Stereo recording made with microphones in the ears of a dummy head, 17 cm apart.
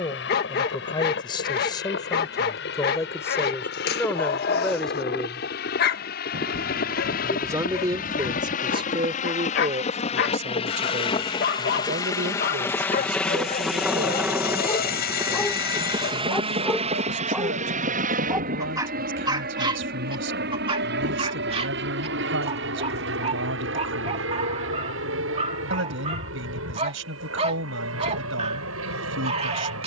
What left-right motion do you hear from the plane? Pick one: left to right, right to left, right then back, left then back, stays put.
left to right.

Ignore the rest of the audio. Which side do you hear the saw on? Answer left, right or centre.
left.